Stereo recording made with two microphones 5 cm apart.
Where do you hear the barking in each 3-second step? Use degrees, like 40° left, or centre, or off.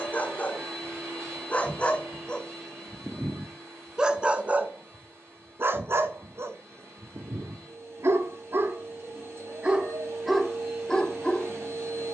30° left, 20° right, 60° right, 10° left.